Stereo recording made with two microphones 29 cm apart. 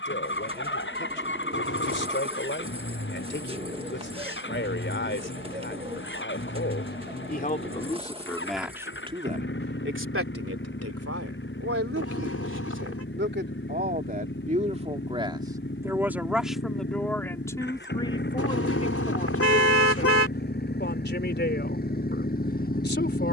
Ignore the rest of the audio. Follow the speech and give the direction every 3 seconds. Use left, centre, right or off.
left, left, left, right, right, centre, left, left.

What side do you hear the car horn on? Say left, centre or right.
left.